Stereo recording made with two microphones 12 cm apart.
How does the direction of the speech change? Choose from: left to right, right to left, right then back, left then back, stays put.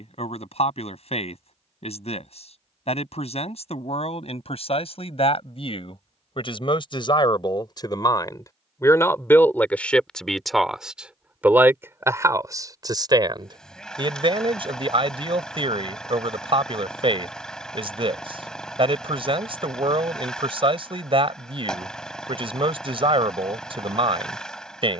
left to right.